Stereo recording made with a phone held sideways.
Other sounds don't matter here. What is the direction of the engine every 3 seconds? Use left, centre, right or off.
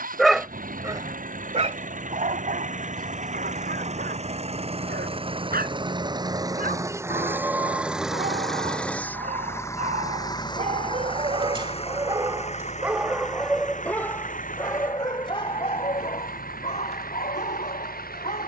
right, right, centre, left, left, left.